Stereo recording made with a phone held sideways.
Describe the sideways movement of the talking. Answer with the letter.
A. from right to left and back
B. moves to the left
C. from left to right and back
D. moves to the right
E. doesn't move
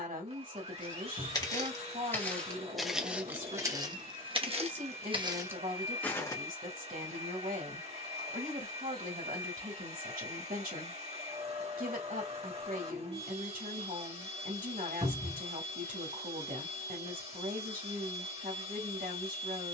E.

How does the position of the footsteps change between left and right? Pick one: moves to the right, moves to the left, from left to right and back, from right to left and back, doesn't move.
from left to right and back.